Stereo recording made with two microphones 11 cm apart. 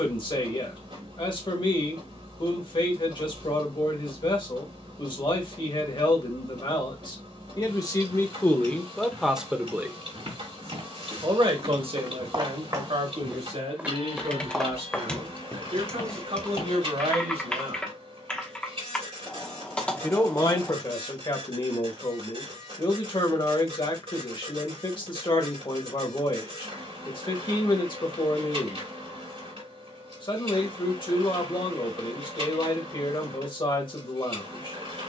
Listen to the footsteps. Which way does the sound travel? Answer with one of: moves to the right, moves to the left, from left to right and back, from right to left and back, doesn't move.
moves to the left.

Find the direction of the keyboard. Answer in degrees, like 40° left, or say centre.
10° left.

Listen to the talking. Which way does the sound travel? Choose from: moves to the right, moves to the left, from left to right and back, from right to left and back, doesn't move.
from left to right and back.